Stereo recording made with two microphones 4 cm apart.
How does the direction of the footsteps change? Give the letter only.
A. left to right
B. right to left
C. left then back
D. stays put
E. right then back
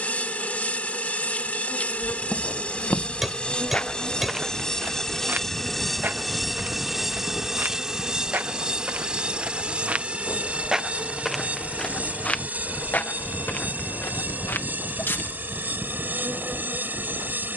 E.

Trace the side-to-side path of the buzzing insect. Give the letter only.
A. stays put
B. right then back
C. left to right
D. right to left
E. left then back
C.